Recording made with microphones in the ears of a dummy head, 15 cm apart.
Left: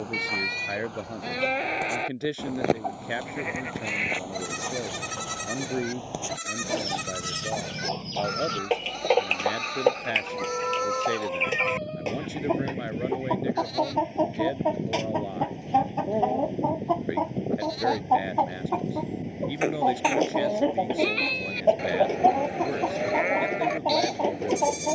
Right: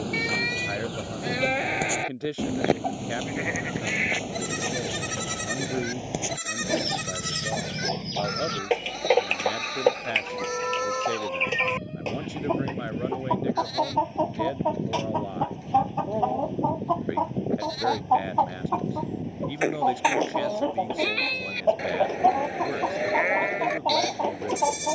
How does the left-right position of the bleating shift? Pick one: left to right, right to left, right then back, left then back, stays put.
stays put.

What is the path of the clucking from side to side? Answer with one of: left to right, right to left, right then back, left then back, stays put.
right to left.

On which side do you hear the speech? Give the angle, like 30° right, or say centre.
10° left.